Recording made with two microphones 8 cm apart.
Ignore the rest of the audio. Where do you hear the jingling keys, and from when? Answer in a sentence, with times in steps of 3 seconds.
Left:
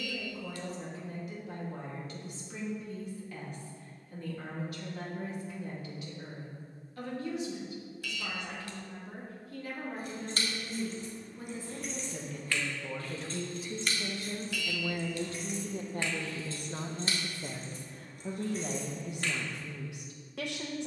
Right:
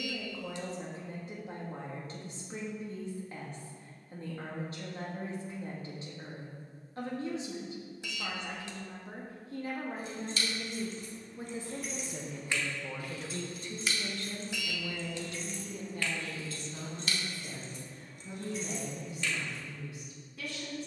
In this clip you hear the jingling keys not at all from 0 s, on the left from 9 s, in the centre from 12 s and on the left from 15 s.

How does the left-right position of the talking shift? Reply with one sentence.
You can hear the talking move from right to left.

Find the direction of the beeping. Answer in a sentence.
You can hear the beeping on the right.